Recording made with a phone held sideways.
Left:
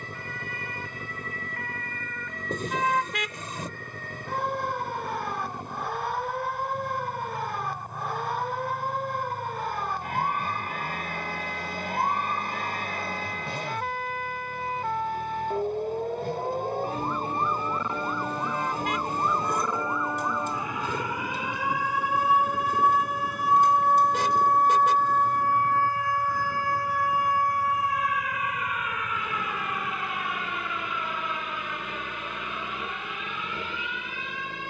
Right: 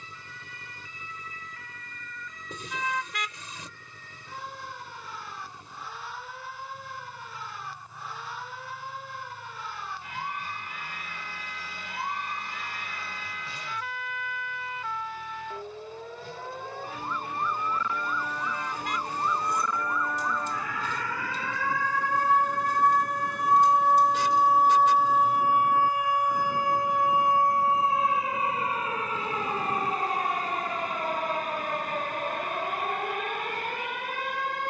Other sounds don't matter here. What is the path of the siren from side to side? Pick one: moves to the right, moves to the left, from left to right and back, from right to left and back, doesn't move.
moves to the right.